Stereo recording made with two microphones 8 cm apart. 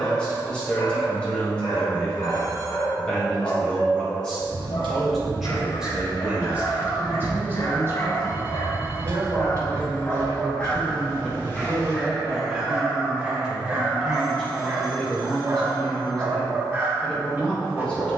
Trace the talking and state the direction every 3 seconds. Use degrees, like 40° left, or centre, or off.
10° left, 10° left, 30° right, 40° right, 10° right, 10° left.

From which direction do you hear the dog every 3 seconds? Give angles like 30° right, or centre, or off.
70° left, 60° left, 50° left, 20° left, 20° right, 30° right.